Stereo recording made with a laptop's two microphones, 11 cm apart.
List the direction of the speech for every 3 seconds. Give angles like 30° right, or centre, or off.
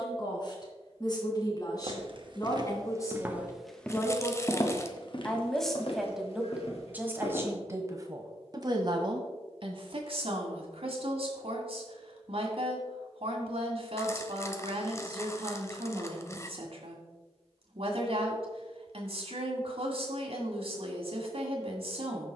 40° left, 20° left, 20° right, 60° right, 60° right, 60° right, 60° right, 60° right.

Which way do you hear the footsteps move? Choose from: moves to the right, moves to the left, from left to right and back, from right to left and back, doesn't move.
moves to the left.